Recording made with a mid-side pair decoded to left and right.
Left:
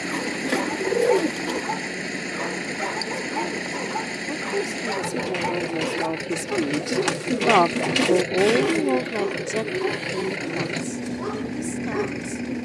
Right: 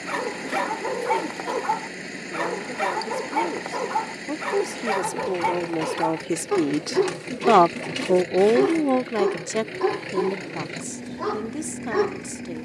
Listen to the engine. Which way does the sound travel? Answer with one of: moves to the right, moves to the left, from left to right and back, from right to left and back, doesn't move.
doesn't move.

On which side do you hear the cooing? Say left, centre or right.
left.